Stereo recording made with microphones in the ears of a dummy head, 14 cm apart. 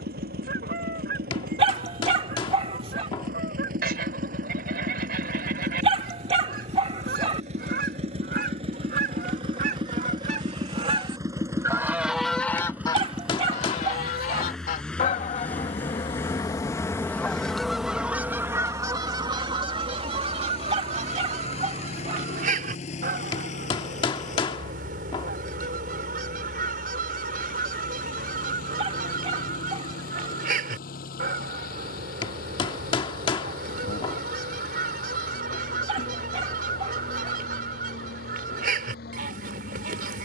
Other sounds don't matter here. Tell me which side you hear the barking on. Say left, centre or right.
right.